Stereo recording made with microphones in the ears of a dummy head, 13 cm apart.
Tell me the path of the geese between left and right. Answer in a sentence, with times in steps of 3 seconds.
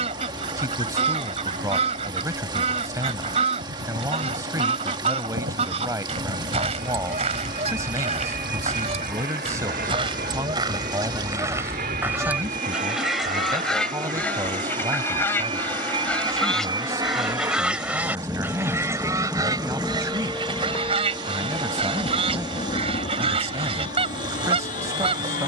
In this clip you hear the geese on the right from 0 s, in the centre from 12 s and on the right from 18 s.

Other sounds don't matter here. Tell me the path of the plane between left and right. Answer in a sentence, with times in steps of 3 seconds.
You can hear the plane on the right from 0 s, in the centre from 18 s and on the left from 21 s.